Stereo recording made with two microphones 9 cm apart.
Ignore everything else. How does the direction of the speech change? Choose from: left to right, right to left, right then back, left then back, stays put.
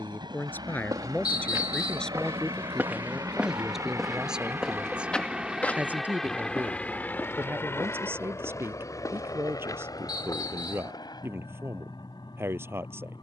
left to right.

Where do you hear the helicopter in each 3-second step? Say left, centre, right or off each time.
right, right, left, left, left.